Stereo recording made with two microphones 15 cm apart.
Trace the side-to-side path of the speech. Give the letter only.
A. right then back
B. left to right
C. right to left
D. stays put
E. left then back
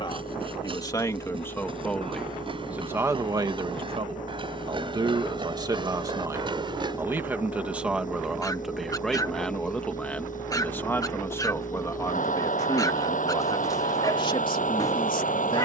A.